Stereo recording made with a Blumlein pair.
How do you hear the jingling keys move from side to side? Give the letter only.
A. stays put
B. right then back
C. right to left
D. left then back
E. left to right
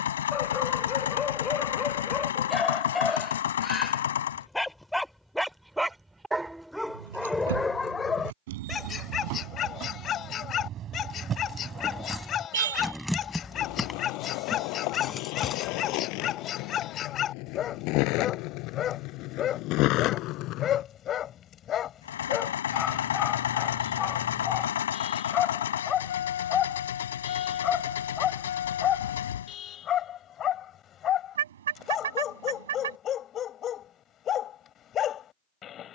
C.